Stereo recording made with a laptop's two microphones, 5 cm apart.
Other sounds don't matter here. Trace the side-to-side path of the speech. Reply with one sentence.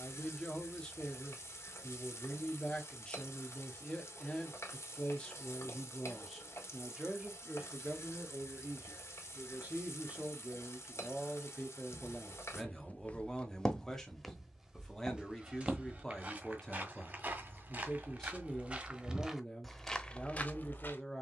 You can hear the speech go right and come back.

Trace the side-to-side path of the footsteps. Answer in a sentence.
You can hear the footsteps go right and come back.